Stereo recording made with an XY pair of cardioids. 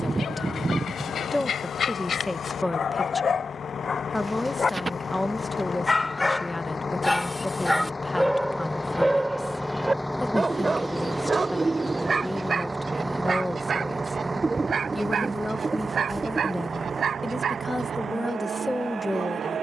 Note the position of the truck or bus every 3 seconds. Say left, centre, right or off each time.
left, left, left, centre, right, right, right.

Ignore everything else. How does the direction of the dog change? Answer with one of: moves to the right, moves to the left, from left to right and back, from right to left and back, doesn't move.
moves to the right.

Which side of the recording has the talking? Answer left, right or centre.
centre.